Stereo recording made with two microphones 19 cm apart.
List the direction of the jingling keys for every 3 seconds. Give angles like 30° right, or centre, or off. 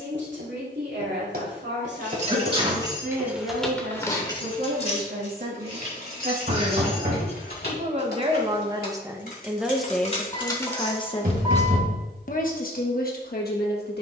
30° right, 20° left, 60° left, 20° left, off.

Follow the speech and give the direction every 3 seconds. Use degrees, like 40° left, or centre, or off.
70° right, 60° right, 40° right, 10° left, 60° left.